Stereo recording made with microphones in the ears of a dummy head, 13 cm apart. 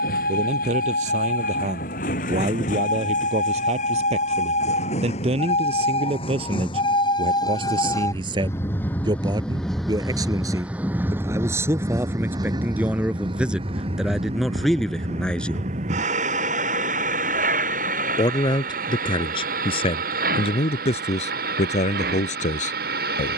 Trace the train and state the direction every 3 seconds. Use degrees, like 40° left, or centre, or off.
60° left, 50° left, 30° left, 10° right, 30° right, 50° right, 60° right, 70° right.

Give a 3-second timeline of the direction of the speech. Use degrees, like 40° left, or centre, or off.
50° right, 40° right, 30° right, 20° right, 10° right, 10° left, 30° left, 50° left.